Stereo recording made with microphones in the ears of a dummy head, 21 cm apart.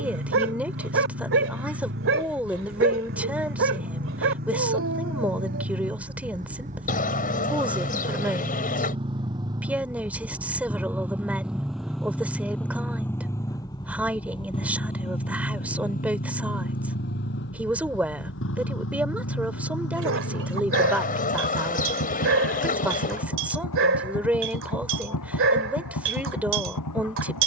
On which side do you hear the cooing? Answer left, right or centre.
left.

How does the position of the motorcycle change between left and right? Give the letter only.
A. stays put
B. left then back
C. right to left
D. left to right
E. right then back
C.